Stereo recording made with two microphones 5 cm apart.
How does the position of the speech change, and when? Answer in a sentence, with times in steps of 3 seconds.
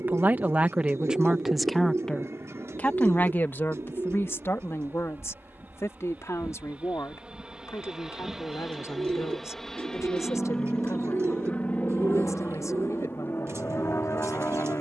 In this clip you hear the speech in the centre from 0 s and on the left from 3 s.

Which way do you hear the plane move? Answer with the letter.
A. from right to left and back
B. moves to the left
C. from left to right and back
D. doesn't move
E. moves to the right
B.